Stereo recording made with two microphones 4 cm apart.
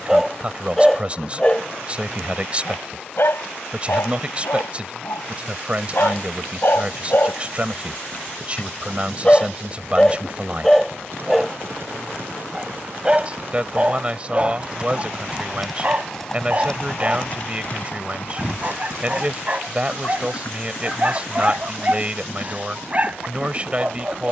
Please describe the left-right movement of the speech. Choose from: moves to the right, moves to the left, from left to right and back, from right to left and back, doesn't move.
doesn't move.